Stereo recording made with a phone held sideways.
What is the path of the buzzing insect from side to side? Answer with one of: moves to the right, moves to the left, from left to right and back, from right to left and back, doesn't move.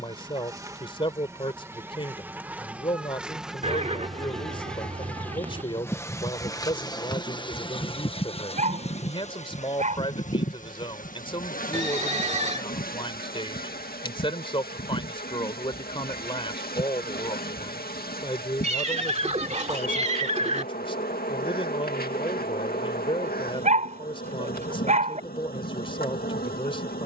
moves to the left.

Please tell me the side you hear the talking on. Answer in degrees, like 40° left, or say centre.
30° left.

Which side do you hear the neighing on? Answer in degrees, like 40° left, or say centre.
40° right.